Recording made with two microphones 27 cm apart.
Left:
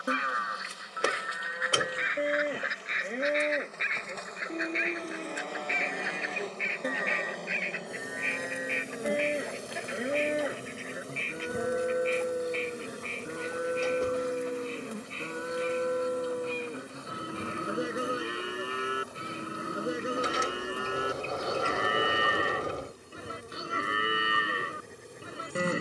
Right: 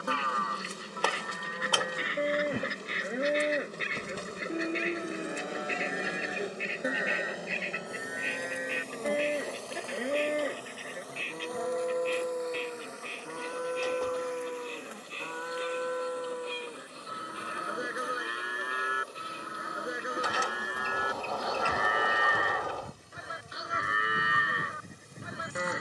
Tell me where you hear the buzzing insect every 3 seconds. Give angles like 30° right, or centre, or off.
50° right, 30° right, centre, 30° left, 40° left, 50° left, 60° left, 70° left, 70° left.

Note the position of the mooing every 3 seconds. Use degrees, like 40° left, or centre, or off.
10° left, 10° right, centre, 10° left, 20° left, 30° left, 30° left, 30° left, 30° left.